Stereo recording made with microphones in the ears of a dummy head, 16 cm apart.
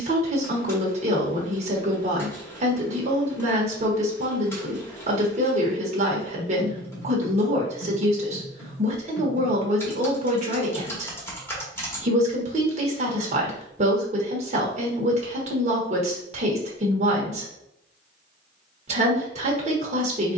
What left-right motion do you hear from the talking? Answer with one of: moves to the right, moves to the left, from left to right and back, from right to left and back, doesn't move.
doesn't move.